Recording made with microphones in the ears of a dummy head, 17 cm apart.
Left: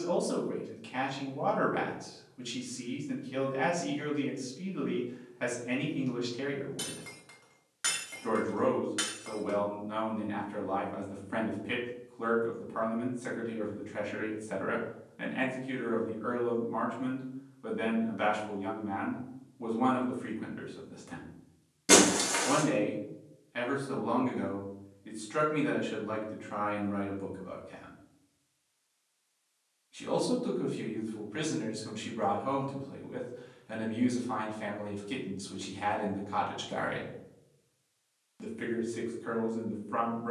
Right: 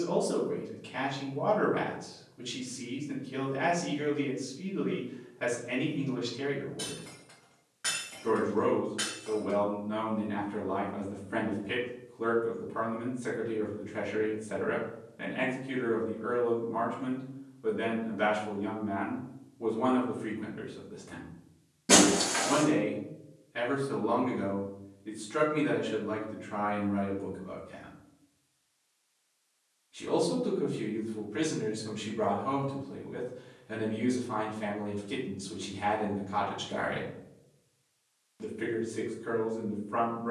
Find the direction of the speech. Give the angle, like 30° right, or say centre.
30° left.